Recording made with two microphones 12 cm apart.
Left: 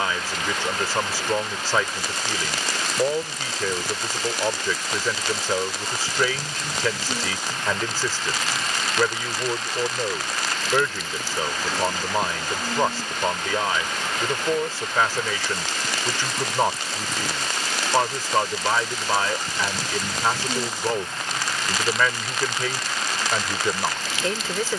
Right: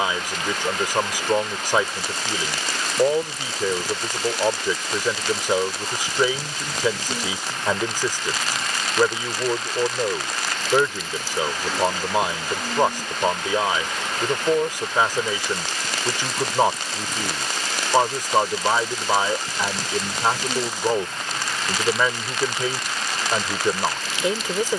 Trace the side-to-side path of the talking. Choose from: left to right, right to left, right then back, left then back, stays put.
stays put.